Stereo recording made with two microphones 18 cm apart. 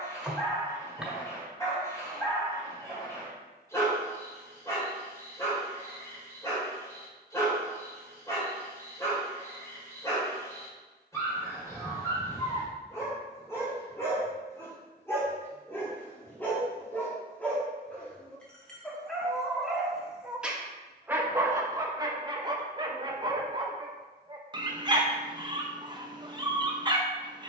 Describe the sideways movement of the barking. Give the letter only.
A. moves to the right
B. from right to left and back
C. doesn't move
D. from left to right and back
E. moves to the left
A.